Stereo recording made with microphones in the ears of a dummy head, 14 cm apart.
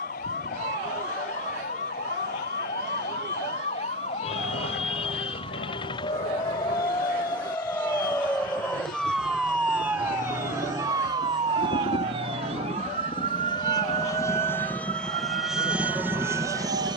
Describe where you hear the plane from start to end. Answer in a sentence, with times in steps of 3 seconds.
In this clip you hear the plane on the left from 0 s and in the centre from 15 s.